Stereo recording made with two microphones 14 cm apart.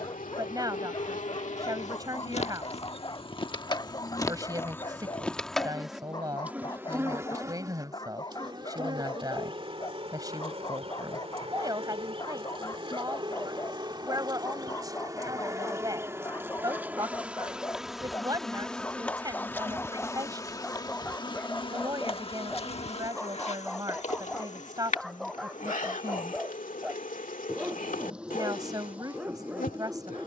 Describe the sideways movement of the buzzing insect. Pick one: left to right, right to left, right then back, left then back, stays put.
right then back.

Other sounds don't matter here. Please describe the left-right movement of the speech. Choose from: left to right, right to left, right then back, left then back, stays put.
stays put.